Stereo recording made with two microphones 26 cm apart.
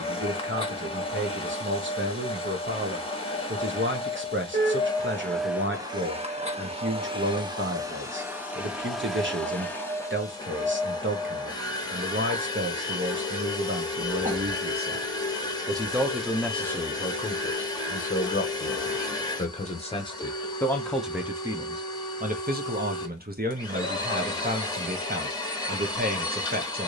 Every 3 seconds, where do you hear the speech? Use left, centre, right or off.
right, right, right, right, right, centre, left, right, right.